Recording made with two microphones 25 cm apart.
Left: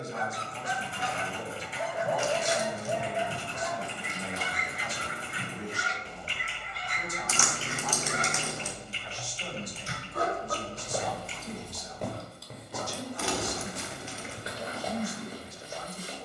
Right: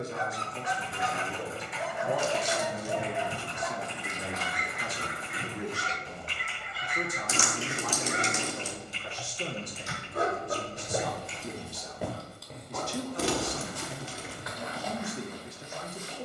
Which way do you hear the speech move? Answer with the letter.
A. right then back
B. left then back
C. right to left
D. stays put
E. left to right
D.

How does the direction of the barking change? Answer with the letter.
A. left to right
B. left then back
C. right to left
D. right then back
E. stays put
D.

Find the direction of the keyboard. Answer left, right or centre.
left.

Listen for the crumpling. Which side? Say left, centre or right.
right.